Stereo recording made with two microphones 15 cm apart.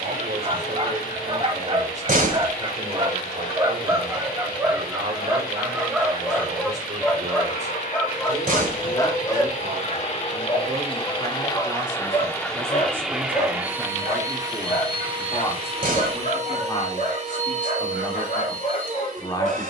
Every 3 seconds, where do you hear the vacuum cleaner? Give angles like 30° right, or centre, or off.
80° left, 70° left, 60° left, 40° left, 10° right, 40° right, 60° right.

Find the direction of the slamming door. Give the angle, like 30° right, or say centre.
60° right.